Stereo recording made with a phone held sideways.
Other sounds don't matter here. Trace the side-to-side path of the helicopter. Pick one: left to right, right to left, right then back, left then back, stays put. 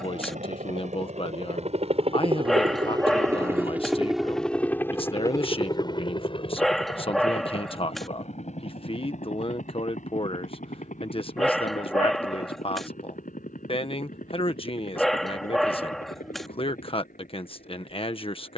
right to left.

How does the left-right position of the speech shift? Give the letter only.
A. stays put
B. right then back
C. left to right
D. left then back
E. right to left
A.